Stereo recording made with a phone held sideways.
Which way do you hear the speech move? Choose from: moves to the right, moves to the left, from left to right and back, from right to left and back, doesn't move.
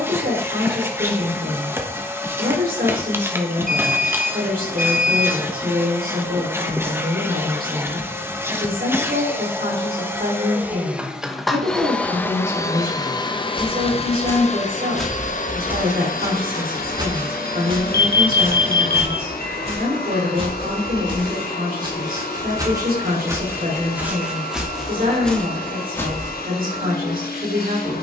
doesn't move.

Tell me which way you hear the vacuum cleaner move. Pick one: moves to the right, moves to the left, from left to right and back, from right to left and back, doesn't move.
moves to the left.